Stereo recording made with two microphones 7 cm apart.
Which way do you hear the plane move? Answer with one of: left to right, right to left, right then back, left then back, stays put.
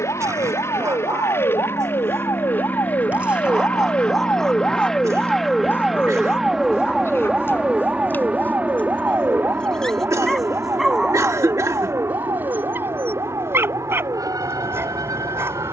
left to right.